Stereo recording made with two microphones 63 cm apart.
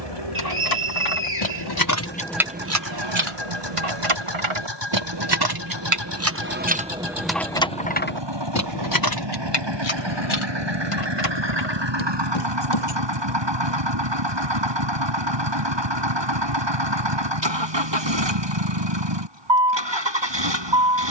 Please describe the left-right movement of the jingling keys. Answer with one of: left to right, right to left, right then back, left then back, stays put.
right then back.